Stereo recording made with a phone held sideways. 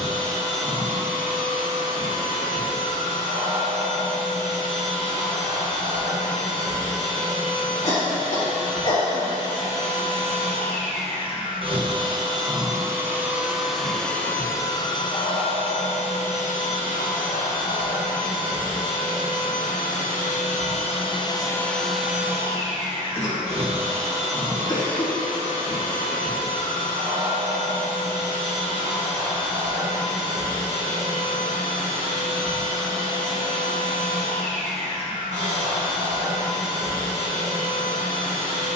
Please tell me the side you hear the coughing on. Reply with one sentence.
You can hear the coughing on the left.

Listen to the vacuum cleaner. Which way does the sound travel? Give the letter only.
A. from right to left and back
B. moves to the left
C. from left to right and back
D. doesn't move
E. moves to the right
A.